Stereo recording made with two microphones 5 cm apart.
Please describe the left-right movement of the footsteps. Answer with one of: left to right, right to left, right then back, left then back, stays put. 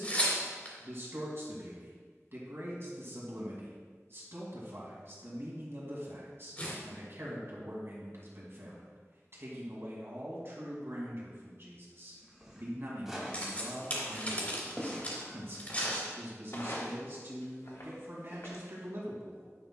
right to left.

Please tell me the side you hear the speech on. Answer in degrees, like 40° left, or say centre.
50° right.